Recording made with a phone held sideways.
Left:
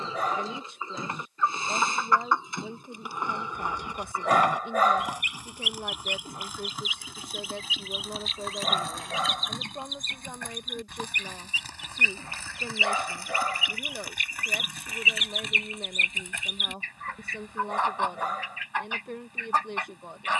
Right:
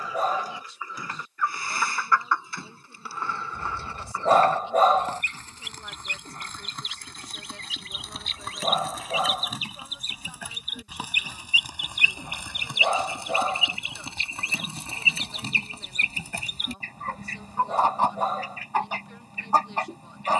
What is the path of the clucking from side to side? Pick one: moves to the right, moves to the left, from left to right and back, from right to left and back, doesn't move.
moves to the right.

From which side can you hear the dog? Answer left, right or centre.
right.